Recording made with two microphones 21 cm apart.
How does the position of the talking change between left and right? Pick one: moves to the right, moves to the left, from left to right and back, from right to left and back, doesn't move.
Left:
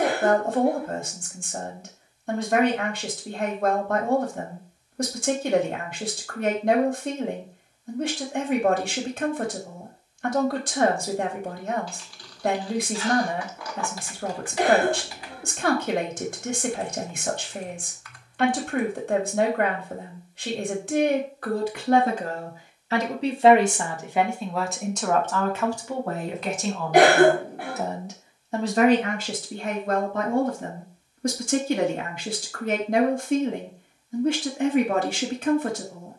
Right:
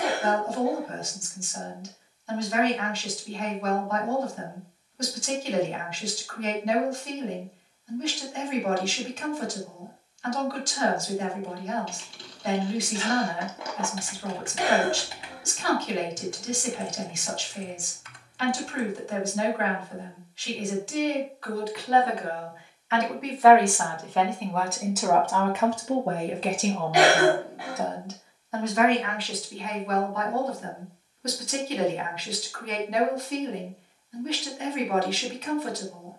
from left to right and back.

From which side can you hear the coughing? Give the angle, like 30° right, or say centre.
50° left.